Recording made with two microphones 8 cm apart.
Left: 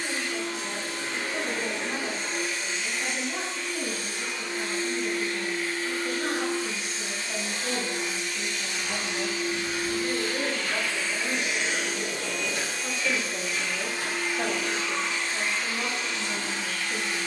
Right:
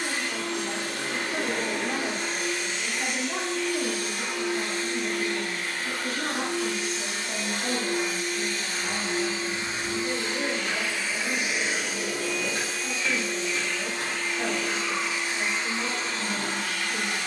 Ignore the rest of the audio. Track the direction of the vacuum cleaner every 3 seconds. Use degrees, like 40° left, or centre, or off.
60° right, 60° right, 50° right, 20° right, centre, 40° right.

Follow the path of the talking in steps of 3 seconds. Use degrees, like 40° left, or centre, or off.
70° right, 60° right, 20° right, 20° left, 20° left, 20° left.